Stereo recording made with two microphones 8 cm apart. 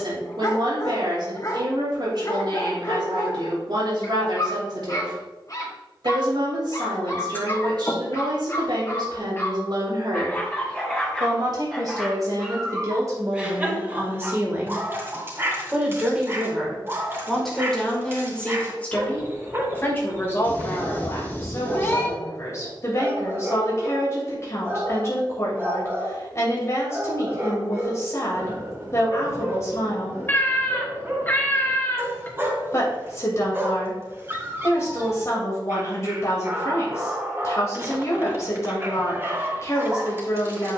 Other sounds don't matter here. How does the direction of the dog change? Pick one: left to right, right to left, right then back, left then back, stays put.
left to right.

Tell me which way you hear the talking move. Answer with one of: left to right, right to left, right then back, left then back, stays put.
right to left.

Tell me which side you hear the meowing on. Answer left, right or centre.
left.